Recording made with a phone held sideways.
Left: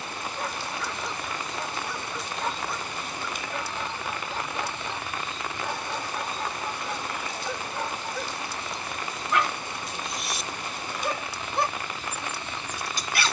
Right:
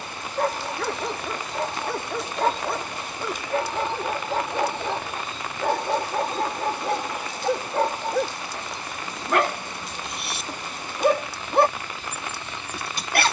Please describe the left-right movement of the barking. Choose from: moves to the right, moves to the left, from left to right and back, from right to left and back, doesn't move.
doesn't move.